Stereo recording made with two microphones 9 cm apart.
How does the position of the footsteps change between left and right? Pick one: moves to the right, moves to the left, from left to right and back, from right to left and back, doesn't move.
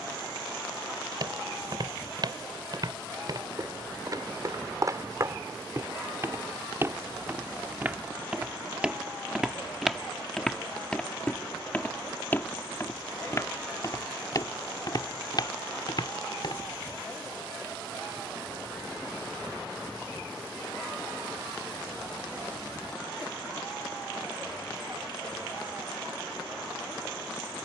moves to the left.